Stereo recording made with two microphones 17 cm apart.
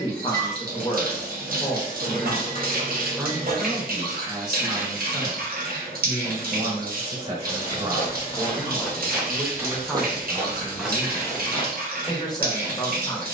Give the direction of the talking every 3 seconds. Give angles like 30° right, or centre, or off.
30° left, 20° right, 30° right, 10° left, 20° left.